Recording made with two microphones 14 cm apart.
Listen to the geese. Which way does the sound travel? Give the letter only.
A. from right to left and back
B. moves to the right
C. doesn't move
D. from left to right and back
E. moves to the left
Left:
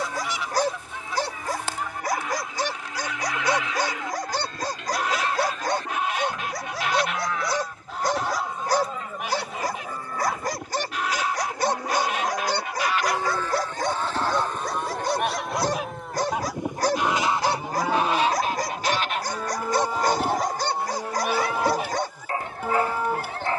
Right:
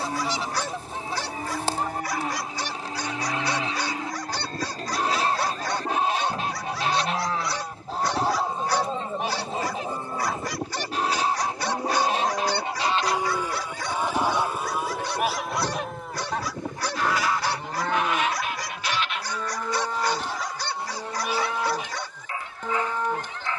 E.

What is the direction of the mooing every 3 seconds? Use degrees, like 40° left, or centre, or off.
40° right, 40° right, 30° right, 20° right, 10° right, centre, 10° left, 10° left.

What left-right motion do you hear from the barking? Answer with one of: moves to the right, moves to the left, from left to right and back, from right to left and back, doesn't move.
doesn't move.